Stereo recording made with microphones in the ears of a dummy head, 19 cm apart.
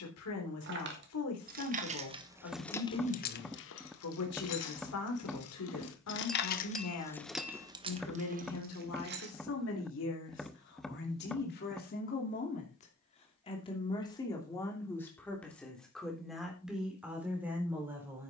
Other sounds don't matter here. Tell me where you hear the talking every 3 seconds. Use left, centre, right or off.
left, left, left, left, left, centre.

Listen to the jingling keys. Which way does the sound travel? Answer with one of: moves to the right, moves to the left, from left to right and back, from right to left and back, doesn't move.
from right to left and back.